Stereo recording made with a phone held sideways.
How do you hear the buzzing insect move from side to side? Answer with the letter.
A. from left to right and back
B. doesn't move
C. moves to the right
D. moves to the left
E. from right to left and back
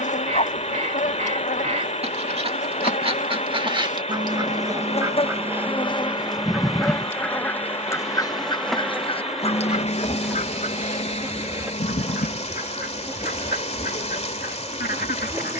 C.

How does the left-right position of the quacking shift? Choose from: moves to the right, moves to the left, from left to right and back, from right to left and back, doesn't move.
moves to the left.